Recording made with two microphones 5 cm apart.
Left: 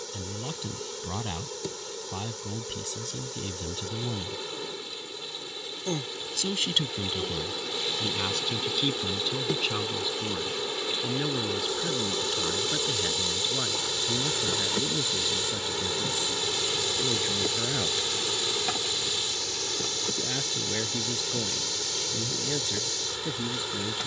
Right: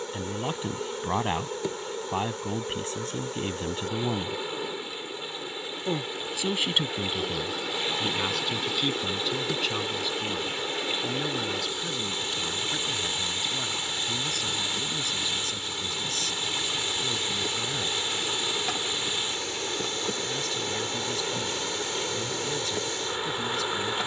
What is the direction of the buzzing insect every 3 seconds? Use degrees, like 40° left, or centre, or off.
20° right, 20° right, centre, 20° left, 30° left, 30° left, 10° right, 20° right.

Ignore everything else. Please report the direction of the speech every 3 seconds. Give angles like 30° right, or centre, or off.
40° right, 40° right, 10° right, centre, 10° left, 20° left, 20° left, 20° left.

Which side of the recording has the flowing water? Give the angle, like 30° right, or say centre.
30° right.